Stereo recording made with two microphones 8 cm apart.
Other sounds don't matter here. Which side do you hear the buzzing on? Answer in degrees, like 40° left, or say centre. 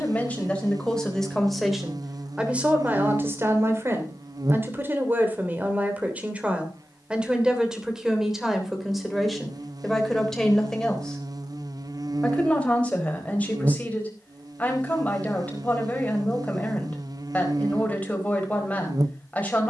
50° right.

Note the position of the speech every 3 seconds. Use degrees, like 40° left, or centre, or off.
centre, 30° right, 10° right, centre, 20° left, 20° left, 20° left.